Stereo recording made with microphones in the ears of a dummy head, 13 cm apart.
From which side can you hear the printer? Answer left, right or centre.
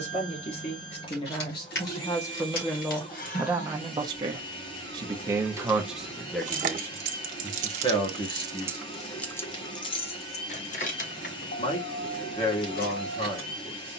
left.